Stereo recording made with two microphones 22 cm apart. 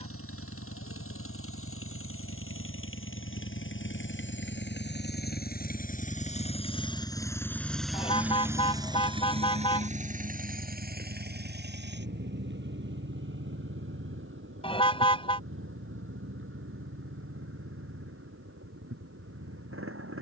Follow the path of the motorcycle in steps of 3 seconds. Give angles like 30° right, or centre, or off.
70° left, 50° left, 10° left, 40° right, 60° right, 70° right, 70° right.